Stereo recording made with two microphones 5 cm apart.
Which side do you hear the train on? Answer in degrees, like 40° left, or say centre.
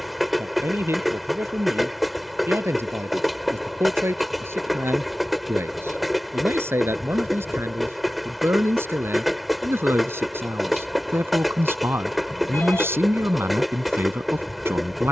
centre.